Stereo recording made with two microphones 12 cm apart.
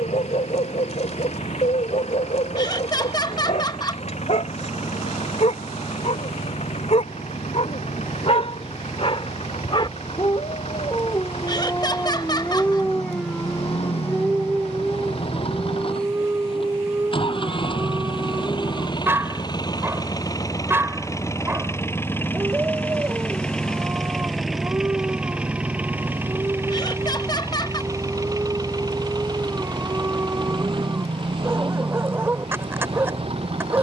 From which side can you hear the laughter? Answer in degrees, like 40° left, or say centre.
40° left.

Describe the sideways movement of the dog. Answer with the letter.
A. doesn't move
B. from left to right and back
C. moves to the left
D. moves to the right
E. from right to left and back
D.